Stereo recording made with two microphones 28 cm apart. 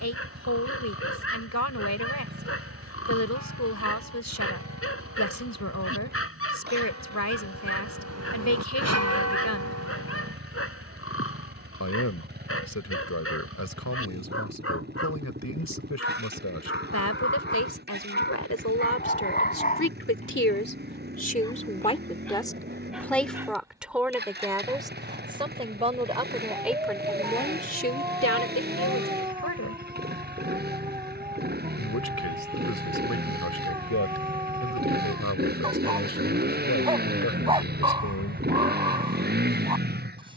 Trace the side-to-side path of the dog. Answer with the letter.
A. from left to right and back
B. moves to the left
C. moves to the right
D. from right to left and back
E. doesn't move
C.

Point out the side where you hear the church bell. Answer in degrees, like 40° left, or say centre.
70° right.